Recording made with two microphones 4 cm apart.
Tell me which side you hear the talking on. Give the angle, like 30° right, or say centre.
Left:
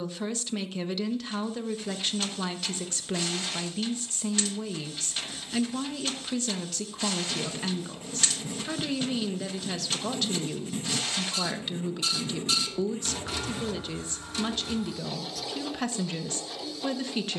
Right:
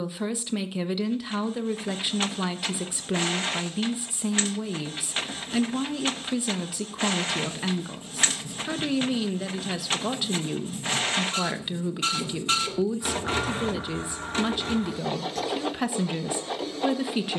10° right.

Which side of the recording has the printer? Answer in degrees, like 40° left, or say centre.
40° right.